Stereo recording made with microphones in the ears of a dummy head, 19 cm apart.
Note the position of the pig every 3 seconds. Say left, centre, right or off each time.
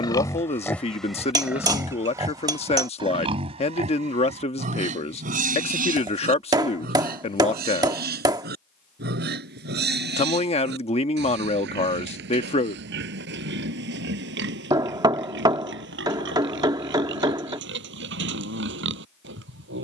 centre, right, right, right, right, right, right.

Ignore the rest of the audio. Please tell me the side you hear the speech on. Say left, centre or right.
left.